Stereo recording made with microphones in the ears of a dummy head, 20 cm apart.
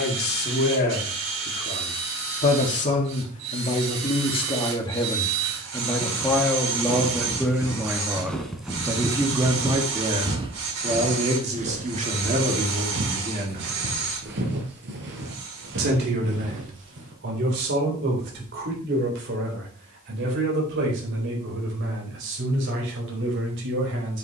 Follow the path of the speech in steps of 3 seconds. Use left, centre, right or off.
left, left, centre, right, right, right, right, right.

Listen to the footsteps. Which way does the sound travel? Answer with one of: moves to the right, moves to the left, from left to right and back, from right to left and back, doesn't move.
moves to the right.